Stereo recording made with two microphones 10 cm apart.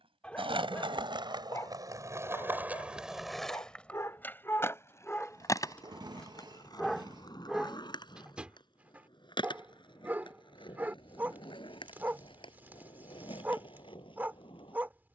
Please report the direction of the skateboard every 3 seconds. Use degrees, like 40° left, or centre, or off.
40° right, 20° left, 50° left, 50° left, 60° left.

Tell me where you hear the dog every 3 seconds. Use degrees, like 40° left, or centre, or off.
30° left, 30° left, centre, 20° right, 20° right.